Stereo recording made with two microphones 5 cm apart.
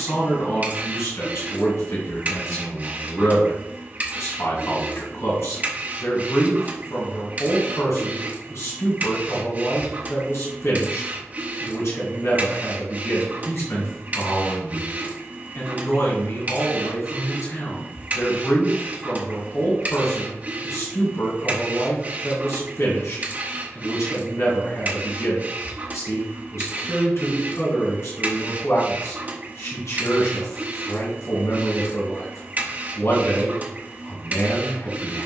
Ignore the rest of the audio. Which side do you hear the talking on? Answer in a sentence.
In this clip you hear the talking on the left.